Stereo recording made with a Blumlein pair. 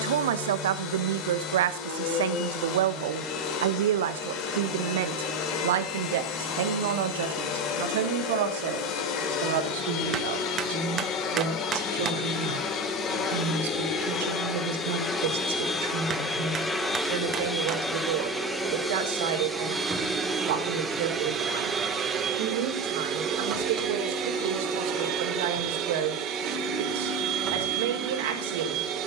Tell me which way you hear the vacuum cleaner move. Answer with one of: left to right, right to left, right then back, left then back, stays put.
left to right.